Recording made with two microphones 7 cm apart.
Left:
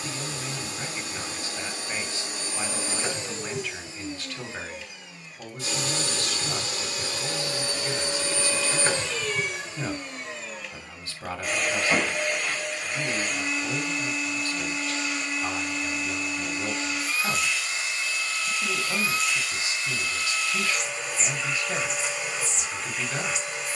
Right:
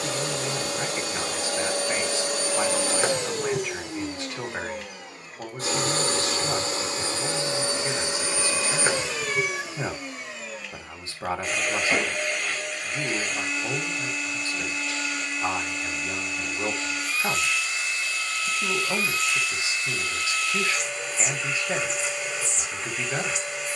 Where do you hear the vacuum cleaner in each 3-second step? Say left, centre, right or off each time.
right, right, right, centre, centre, centre, centre, centre.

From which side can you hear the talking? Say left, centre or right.
right.